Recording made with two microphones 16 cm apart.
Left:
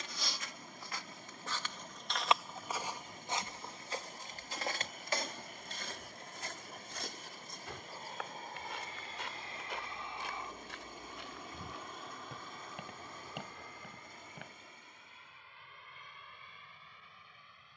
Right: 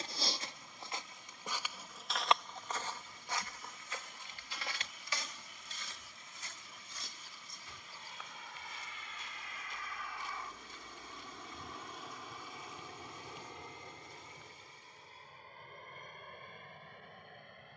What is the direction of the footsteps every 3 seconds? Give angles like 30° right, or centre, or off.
10° right, 40° left, 70° left, 80° left, 80° left, off.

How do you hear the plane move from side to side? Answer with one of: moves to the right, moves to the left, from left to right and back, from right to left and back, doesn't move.
moves to the right.